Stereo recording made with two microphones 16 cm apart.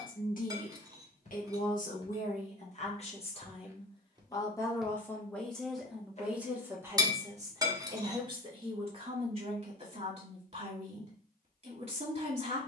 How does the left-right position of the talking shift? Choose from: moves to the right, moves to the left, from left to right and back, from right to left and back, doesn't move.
moves to the right.